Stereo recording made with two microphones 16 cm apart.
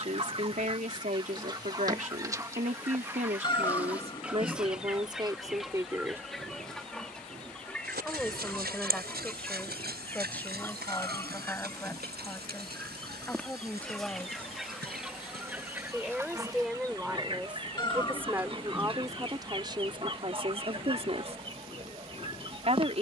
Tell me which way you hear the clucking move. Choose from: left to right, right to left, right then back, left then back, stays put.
left then back.